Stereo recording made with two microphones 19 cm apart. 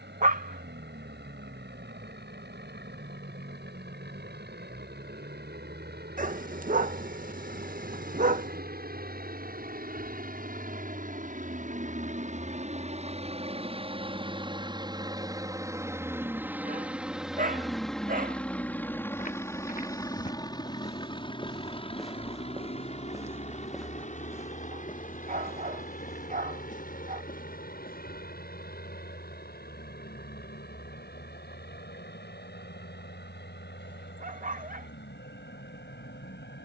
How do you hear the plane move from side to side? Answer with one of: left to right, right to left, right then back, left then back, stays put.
right to left.